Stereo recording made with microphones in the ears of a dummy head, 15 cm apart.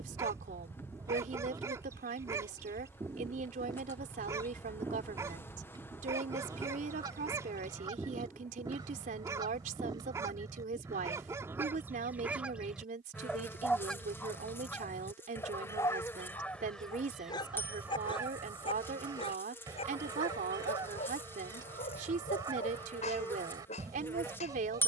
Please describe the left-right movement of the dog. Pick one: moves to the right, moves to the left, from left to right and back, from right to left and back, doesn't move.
moves to the left.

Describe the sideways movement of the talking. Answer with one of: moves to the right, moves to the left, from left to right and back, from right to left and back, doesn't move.
doesn't move.